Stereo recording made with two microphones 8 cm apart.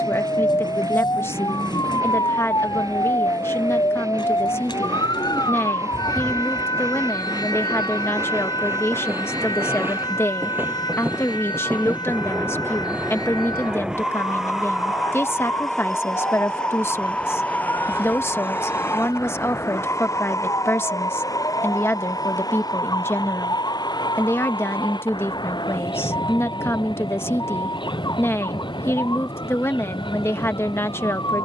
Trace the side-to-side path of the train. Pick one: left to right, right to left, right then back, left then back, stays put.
right to left.